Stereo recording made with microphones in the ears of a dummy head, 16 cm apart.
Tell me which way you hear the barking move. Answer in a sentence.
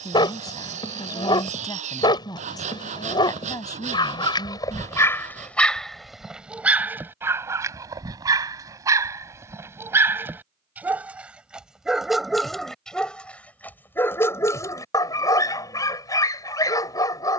In this clip you hear the barking move from left to right and back again.